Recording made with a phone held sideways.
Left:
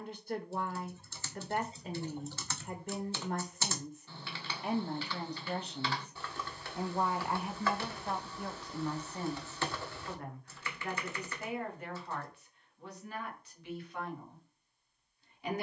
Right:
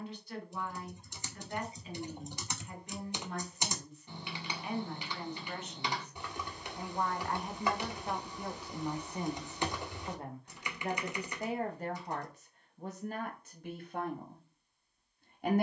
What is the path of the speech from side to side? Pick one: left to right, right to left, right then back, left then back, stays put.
left to right.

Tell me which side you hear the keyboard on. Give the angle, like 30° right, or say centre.
20° right.